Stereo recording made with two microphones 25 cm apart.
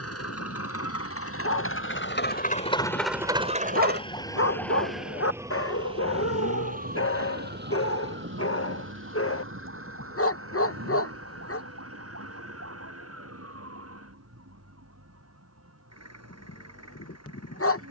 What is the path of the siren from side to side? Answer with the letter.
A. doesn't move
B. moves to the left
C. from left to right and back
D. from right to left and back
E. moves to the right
E.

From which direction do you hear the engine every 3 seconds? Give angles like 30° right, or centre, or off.
60° left, 40° right, 70° right, 80° right, 80° right, 80° right.